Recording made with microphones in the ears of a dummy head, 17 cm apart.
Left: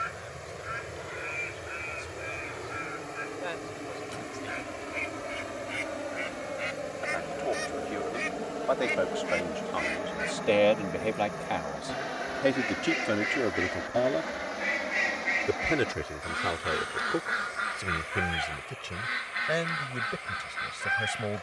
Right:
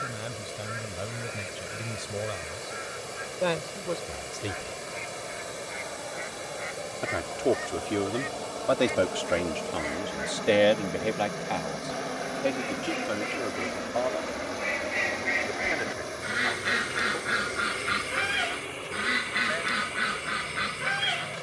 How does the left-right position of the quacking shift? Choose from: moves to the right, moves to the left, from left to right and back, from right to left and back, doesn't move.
moves to the right.